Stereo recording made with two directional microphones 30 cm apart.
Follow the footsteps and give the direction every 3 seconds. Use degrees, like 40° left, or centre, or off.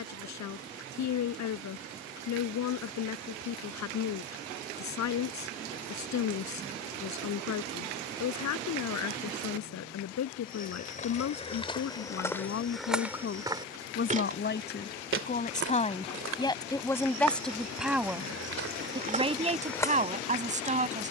off, off, off, 20° left, centre, 60° right, 30° right.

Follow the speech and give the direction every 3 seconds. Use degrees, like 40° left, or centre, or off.
60° left, 60° left, 60° left, 60° left, 40° left, 10° left, 20° right.